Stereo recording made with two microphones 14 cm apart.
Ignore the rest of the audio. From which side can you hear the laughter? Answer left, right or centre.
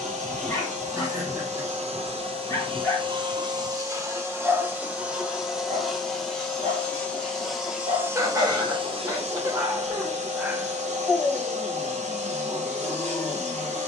right.